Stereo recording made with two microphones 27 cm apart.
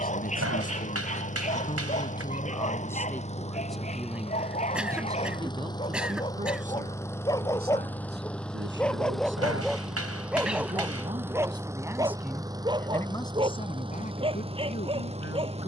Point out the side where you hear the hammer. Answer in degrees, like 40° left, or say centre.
60° right.